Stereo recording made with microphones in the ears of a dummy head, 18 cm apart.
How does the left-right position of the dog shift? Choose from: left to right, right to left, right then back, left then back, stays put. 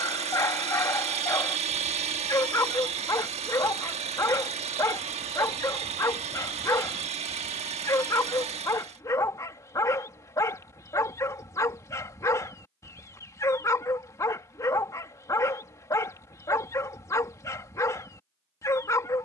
stays put.